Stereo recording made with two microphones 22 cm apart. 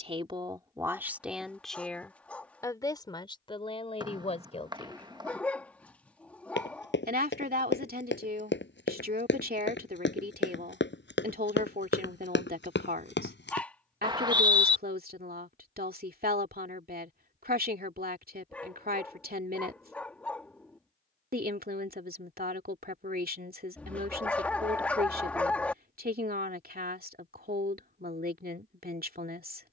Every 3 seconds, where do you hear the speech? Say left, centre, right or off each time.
centre, left, right, right, right, right, right, right, right, right.